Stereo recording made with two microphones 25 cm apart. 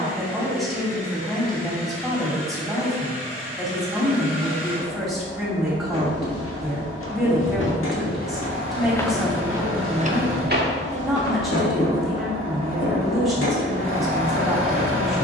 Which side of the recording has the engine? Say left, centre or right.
left.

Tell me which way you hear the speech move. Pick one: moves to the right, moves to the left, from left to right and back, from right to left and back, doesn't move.
doesn't move.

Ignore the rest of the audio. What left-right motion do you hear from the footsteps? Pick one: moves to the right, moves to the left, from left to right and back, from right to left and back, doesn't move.
moves to the right.